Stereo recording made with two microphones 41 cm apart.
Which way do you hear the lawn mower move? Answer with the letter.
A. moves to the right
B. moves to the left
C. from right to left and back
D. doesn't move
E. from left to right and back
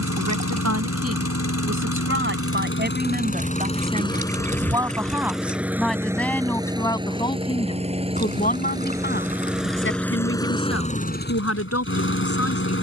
E.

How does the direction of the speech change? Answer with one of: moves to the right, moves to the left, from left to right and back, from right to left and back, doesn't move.
moves to the left.